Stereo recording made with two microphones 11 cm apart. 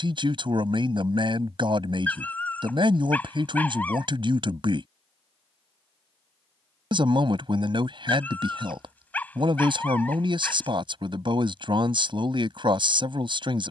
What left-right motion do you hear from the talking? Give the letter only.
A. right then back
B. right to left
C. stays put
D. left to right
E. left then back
C.